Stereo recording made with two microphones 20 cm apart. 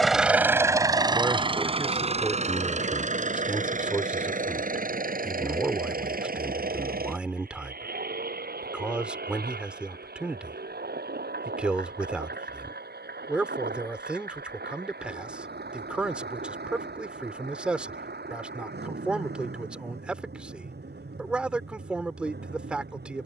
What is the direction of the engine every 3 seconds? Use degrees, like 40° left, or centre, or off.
20° right, 40° right, 50° right, 50° right, 50° right, 50° right, 50° right, 60° right.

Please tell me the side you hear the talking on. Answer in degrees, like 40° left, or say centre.
10° right.